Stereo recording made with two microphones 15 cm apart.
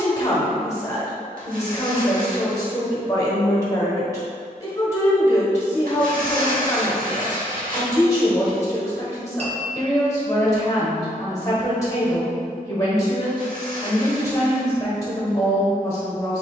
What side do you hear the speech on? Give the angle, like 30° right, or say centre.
20° left.